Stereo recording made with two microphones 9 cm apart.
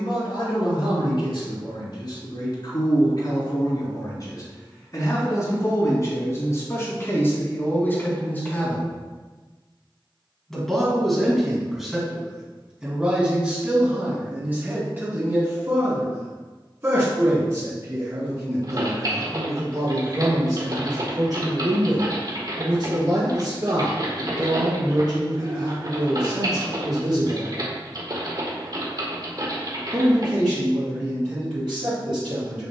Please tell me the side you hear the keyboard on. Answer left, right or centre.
right.